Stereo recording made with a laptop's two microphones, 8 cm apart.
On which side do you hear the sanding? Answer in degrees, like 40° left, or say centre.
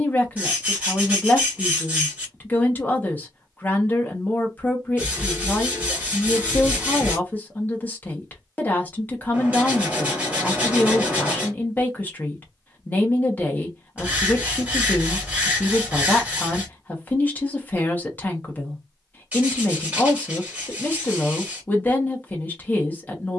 20° right.